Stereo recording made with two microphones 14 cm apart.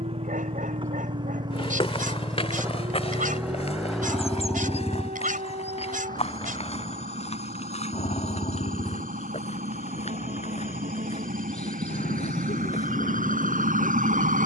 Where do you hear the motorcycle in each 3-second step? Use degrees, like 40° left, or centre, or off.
30° right, 10° left, 40° left, 60° left, 70° left.